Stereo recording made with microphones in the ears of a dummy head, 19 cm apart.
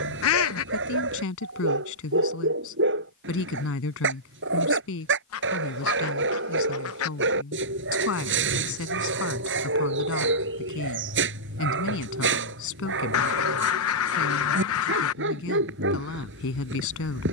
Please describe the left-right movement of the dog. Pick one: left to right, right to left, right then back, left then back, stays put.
stays put.